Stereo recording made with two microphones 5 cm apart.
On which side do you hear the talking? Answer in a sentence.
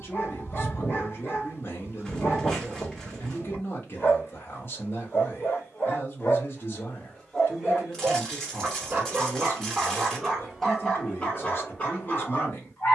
You can hear the talking on the left.